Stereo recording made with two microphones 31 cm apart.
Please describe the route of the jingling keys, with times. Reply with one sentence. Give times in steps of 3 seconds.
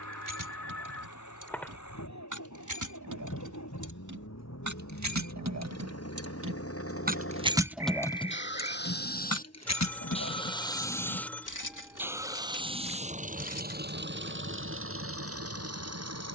In this clip you hear the jingling keys on the right from 0 s, in the centre from 6 s, on the left from 9 s and not at all from 15 s.